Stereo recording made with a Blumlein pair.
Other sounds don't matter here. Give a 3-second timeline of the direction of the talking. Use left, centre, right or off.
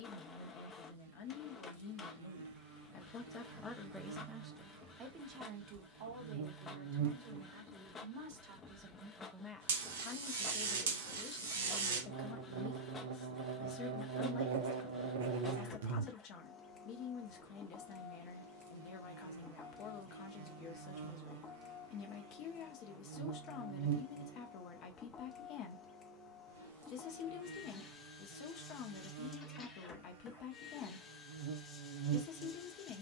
left, centre, right, left, left, left, left, left, left, left, left.